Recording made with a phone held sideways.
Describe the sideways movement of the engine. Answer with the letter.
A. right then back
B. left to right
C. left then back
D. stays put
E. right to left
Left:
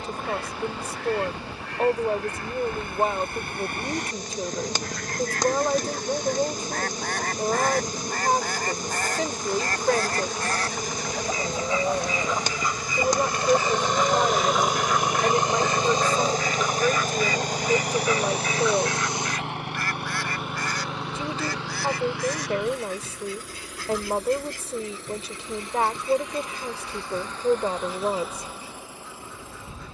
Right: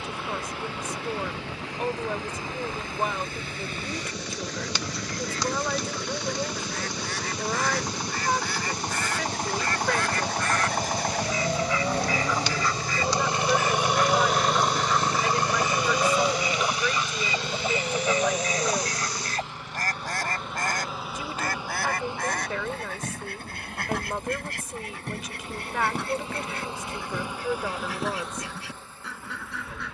E.